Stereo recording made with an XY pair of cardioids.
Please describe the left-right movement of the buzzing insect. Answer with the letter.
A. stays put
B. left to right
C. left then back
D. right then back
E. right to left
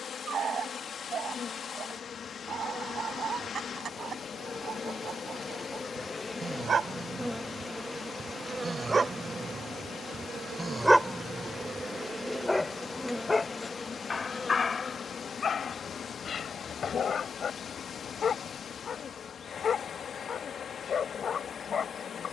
D.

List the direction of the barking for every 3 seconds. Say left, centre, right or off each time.
right, right, right, centre, left, left, left, left.